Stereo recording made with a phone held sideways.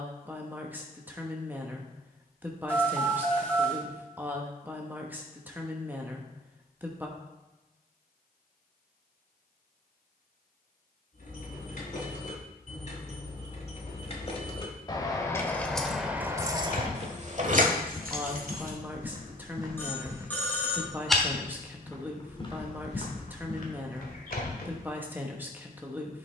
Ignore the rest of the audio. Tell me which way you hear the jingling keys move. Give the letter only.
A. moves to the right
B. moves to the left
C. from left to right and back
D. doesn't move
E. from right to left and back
A.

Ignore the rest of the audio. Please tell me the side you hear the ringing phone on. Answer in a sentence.
In this clip you hear the ringing phone in the centre.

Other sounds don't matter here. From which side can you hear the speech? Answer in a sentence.
In this clip you hear the speech in the centre.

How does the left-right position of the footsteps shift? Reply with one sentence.
You can hear the footsteps go right and come back.